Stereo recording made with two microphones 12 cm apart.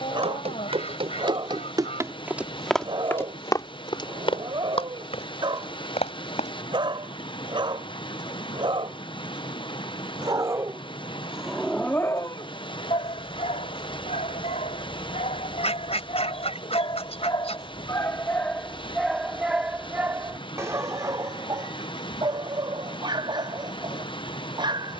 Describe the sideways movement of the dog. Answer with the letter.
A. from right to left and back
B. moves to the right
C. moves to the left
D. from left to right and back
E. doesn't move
A.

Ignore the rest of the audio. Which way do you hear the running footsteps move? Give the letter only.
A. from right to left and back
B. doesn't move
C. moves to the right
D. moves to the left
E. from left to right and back
D.